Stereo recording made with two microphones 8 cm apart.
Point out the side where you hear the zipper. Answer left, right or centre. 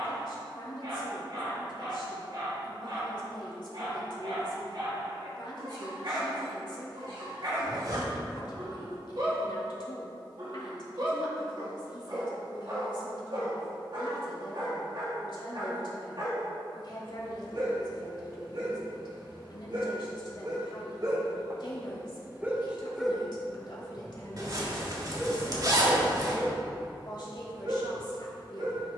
right.